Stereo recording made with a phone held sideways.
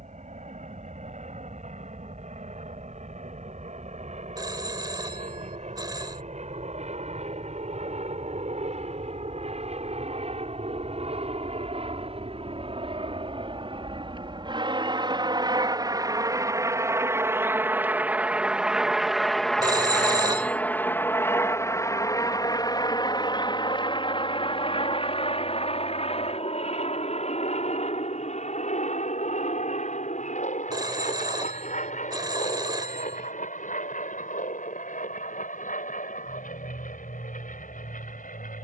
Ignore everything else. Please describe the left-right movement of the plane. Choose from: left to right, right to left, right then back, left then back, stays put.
right to left.